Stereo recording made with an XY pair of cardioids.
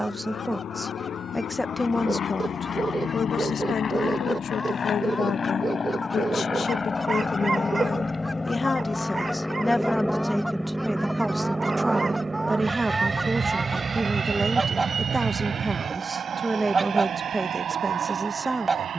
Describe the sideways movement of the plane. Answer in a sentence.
You can hear the plane move from left to right.